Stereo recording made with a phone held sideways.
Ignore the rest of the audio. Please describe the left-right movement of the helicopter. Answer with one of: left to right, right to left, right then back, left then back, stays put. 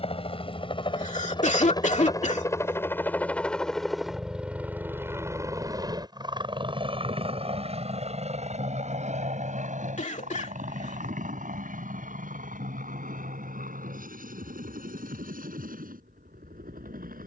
left to right.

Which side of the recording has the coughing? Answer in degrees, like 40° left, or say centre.
60° left.